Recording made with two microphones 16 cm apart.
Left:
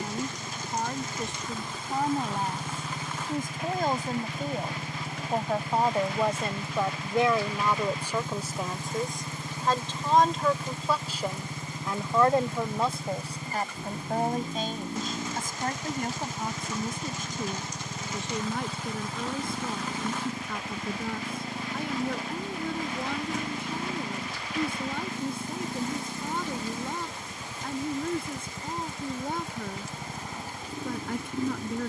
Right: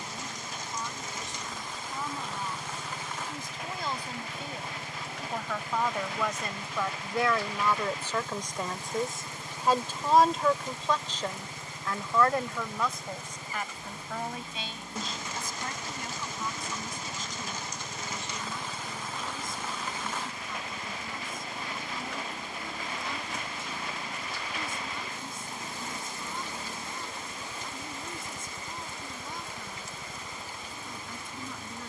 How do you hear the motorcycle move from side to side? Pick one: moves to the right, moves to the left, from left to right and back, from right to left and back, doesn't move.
doesn't move.